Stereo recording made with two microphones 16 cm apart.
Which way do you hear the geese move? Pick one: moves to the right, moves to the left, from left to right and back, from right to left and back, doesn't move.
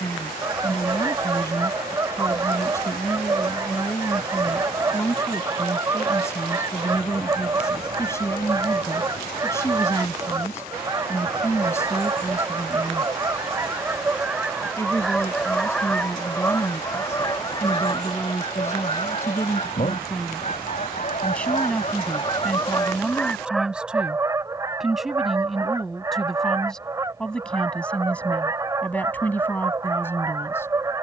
from right to left and back.